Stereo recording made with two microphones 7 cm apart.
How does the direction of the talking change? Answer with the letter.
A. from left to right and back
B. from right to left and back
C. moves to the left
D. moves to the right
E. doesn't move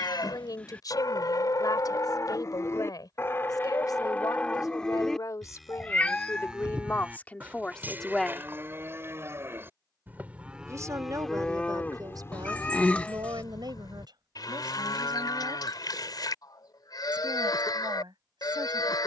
D.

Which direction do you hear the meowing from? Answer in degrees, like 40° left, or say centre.
20° left.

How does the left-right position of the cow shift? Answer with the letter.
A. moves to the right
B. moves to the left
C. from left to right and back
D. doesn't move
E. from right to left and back
C.